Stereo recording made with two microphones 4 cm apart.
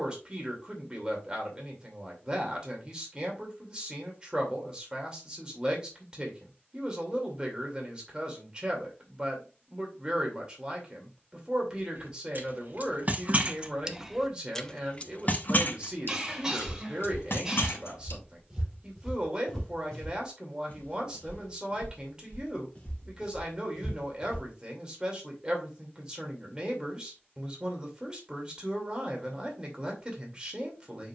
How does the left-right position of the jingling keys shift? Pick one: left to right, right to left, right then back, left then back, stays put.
right to left.